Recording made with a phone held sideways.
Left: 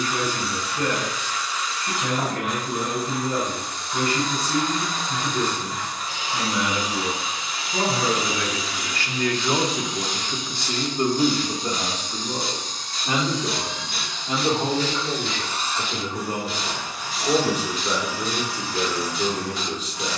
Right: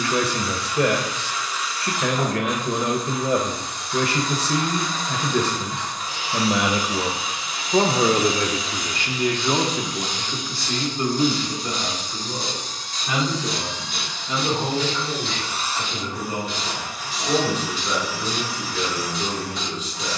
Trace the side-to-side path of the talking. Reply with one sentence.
In this clip you hear the talking go from the right side to the left.